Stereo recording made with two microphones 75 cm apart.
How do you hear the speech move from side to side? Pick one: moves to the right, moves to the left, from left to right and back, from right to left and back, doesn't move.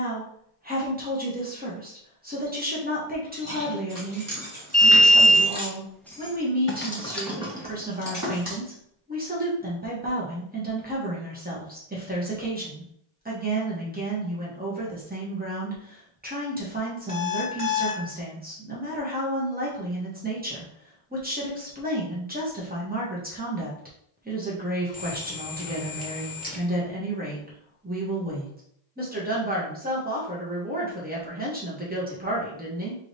doesn't move.